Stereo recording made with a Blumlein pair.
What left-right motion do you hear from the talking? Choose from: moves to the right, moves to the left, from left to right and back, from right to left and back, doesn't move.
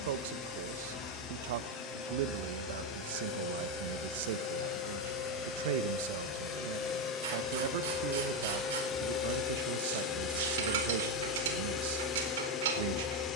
doesn't move.